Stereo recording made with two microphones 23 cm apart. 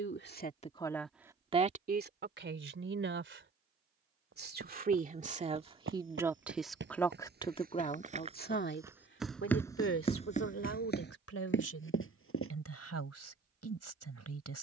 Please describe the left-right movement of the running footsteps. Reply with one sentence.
In this clip you hear the running footsteps go from the right side to the left.